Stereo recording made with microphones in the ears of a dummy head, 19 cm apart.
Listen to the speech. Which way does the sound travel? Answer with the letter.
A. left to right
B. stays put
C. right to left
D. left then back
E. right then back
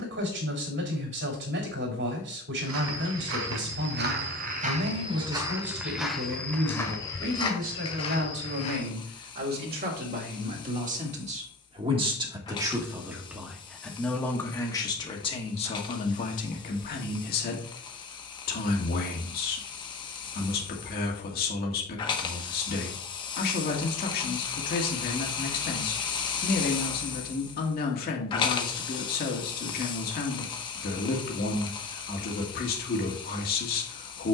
C.